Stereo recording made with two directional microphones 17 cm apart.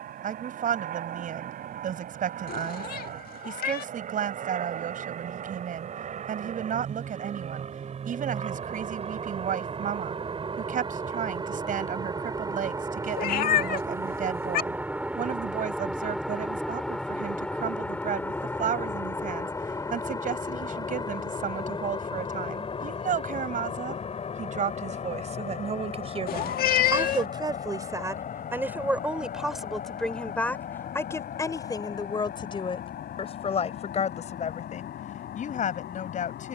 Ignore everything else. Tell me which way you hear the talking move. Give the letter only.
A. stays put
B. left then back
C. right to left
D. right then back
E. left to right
C.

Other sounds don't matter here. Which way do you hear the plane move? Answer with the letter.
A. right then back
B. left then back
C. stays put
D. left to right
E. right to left
E.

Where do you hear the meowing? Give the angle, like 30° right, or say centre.
60° left.